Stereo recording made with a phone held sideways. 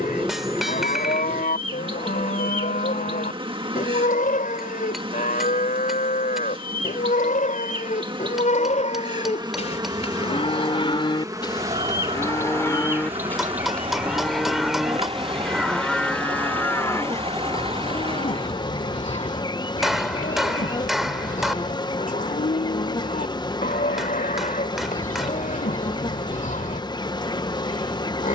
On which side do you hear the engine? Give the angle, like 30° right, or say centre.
40° right.